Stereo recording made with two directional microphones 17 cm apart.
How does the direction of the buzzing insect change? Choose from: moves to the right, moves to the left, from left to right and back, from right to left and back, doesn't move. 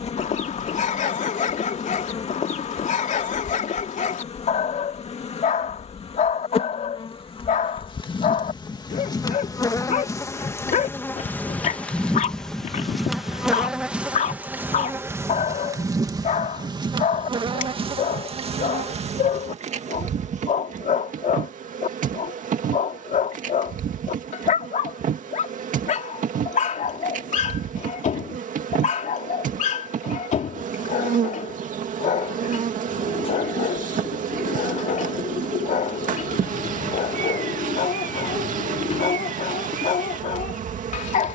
moves to the right.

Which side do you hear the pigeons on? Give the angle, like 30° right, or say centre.
30° left.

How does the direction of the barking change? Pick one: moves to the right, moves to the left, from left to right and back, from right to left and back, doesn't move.
doesn't move.